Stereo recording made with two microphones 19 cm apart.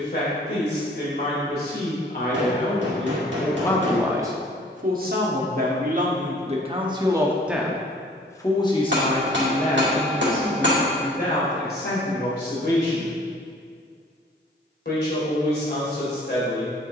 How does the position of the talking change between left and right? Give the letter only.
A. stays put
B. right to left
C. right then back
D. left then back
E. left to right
C.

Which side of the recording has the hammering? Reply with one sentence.
You can hear the hammering on the right.